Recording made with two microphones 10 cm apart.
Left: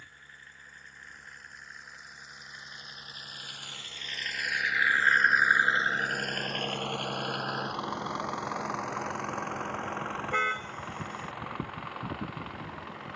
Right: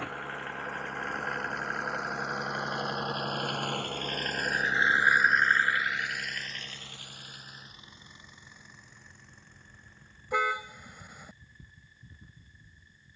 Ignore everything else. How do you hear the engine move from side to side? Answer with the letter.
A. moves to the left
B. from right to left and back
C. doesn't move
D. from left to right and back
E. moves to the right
A.